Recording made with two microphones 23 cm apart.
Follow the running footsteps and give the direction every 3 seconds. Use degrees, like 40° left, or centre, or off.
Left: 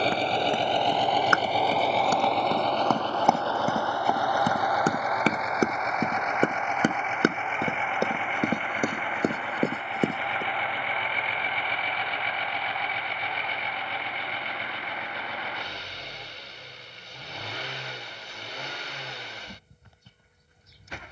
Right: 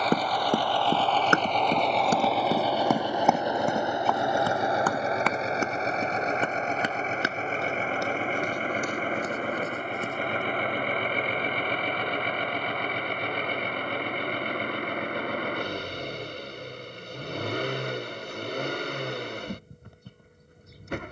30° right, 20° left, 60° left, 70° left, off, off, off.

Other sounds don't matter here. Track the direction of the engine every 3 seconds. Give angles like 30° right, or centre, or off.
10° left, 20° right, 40° right, 50° right, 50° right, 60° right, 60° right.